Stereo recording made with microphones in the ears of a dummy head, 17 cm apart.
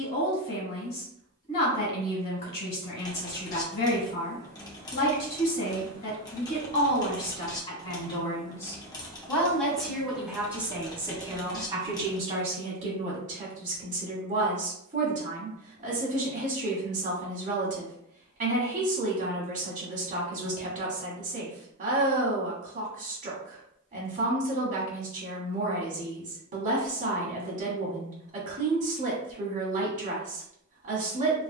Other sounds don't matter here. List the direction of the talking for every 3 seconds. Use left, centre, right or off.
left, left, left, centre, right, right, right, right, right, right, right.